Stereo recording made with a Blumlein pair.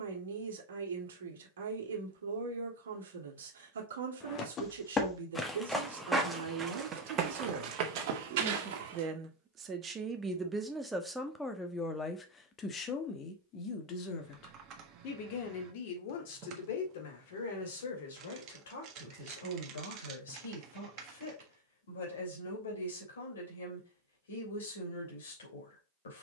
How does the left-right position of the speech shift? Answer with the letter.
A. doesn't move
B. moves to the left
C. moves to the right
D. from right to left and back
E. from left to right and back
B.